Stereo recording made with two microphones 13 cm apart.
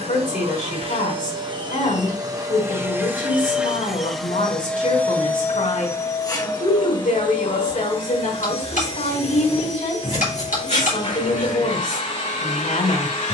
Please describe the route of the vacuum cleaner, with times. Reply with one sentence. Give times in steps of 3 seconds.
You can hear the vacuum cleaner on the right from 0 s, in the centre from 3 s and on the left from 6 s.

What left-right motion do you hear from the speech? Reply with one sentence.
In this clip you hear the speech stay in one place.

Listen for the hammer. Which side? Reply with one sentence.
You can hear the hammer on the left.